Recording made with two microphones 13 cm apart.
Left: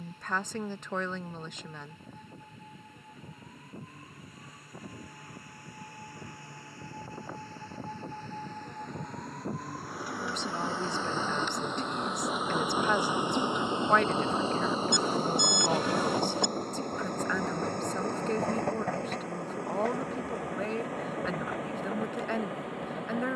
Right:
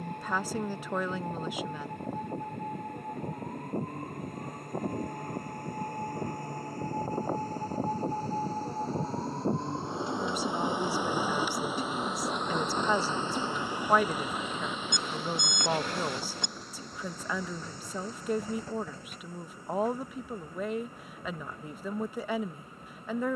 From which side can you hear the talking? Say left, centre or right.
centre.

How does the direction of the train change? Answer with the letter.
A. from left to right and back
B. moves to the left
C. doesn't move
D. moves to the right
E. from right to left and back
B.